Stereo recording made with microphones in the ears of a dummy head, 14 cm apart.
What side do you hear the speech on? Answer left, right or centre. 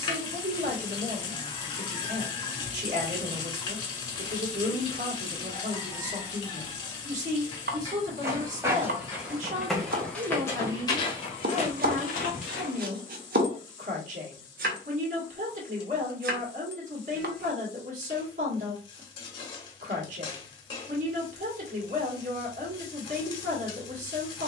right.